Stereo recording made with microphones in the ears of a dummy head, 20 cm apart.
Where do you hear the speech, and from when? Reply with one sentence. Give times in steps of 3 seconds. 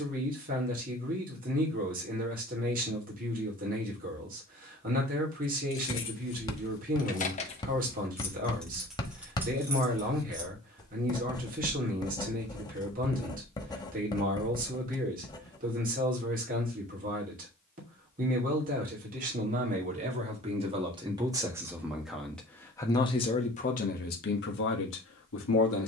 In this clip you hear the speech on the right from 0 s, in the centre from 21 s and on the left from 24 s.